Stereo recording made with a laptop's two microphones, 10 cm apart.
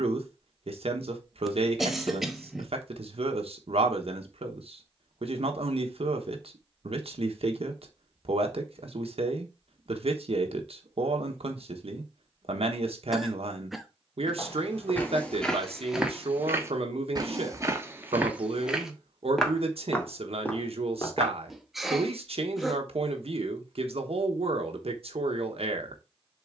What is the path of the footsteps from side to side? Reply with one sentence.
You can hear the footsteps move from left to right and back again.